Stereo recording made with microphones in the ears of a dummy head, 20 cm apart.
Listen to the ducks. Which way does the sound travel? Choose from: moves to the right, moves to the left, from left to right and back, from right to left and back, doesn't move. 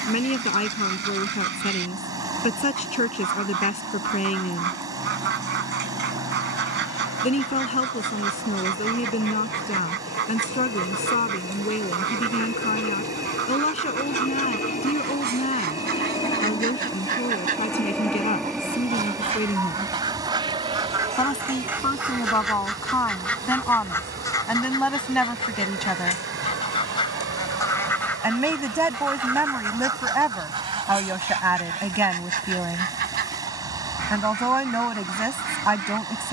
from right to left and back.